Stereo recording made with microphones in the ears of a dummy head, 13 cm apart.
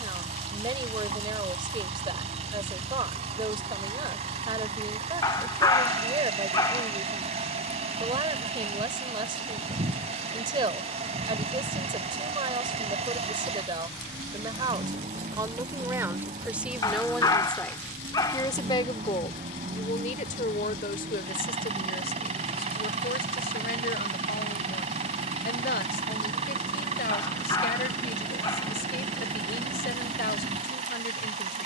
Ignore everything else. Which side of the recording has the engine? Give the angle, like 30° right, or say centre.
50° right.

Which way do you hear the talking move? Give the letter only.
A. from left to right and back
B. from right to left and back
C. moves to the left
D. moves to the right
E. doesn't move
C.